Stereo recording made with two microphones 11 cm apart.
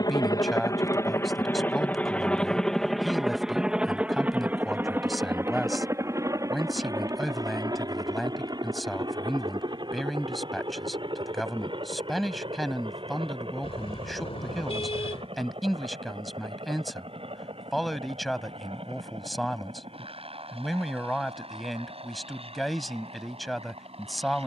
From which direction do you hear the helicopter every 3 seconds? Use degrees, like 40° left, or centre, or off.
20° left, 10° right, 30° right, 40° right, 50° right, 50° right, 60° right, 60° right.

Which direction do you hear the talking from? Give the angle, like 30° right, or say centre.
centre.